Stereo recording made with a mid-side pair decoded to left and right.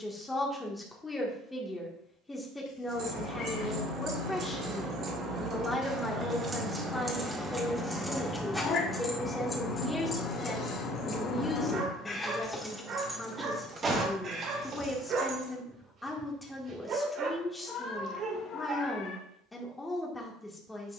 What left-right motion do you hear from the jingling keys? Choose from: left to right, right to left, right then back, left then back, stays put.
left then back.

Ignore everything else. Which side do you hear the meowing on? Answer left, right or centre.
left.